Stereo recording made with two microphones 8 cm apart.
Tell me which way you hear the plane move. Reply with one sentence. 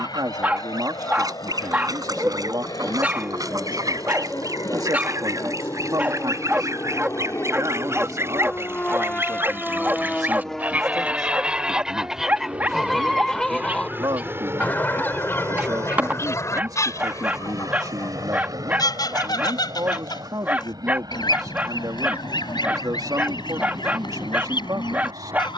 In this clip you hear the plane move to the right.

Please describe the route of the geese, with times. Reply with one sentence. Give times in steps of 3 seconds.
You can hear the geese on the right from 0 s, in the centre from 12 s and on the left from 15 s.